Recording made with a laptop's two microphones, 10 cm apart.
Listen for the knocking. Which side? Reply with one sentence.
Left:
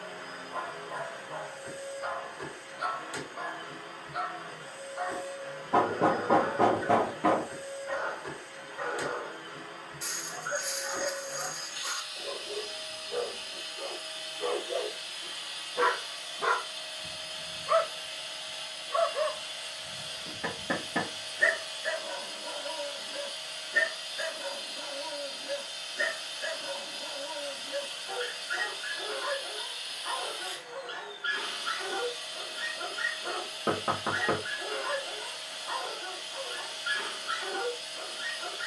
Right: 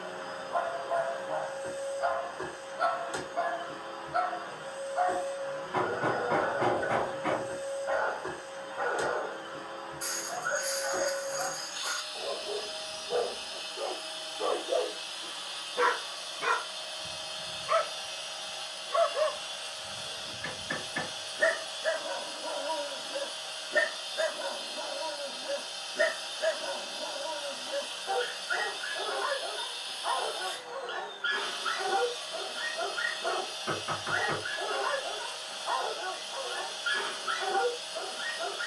You can hear the knocking on the left.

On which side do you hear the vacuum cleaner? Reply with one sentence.
You can hear the vacuum cleaner on the right.